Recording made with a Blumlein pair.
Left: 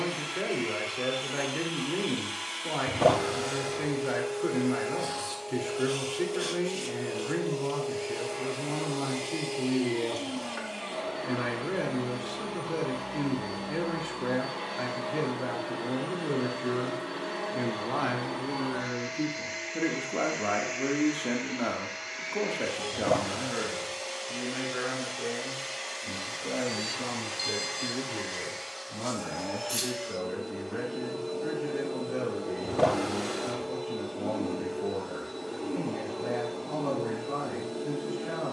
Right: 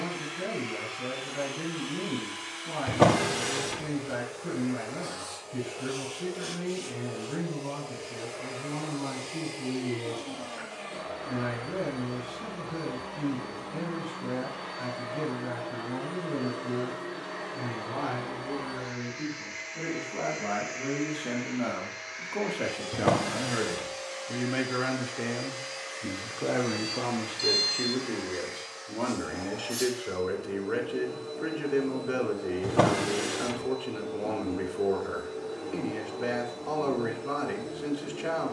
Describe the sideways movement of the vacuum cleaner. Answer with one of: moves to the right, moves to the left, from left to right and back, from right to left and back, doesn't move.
doesn't move.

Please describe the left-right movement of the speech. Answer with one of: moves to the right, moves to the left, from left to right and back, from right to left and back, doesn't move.
moves to the right.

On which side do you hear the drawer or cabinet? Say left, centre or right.
right.